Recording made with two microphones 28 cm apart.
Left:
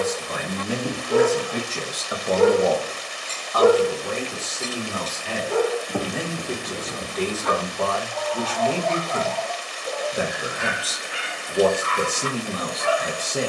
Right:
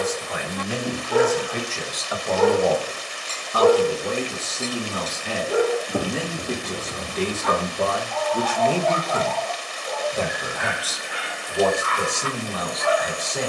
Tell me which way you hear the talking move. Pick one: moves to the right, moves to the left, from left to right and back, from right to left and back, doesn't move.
from left to right and back.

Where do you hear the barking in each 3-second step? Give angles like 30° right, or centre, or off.
30° left, centre, 20° left, 30° left, 30° left.